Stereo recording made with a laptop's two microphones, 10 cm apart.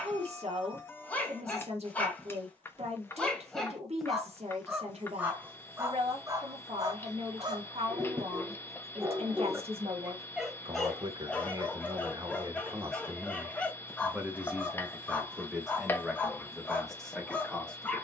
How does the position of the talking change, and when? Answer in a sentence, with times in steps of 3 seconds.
You can hear the talking on the right from 0 s and in the centre from 15 s.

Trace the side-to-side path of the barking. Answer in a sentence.
You can hear the barking move from left to right and back again.